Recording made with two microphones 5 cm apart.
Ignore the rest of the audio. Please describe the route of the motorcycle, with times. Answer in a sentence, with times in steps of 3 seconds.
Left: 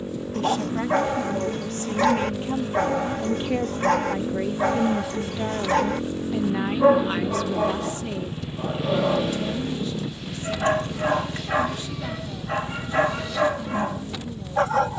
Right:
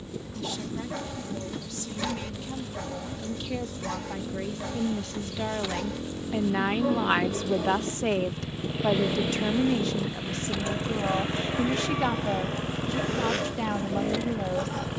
In this clip you hear the motorcycle on the left from 0 s, in the centre from 6 s and on the right from 9 s.